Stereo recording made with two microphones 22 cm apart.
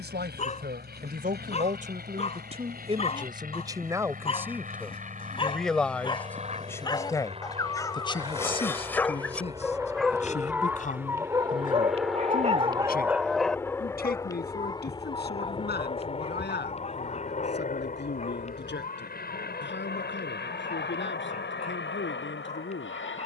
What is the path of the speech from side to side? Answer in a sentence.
In this clip you hear the speech travel towards the left.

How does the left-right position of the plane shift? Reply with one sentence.
You can hear the plane move from right to left.